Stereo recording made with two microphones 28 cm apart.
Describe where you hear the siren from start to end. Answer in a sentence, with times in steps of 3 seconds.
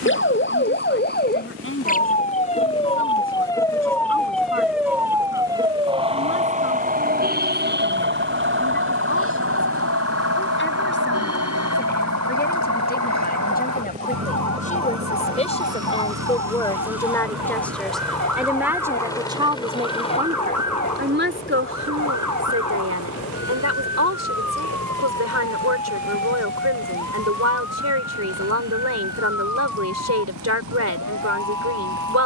You can hear the siren on the left from 0 s, in the centre from 3 s and on the right from 6 s.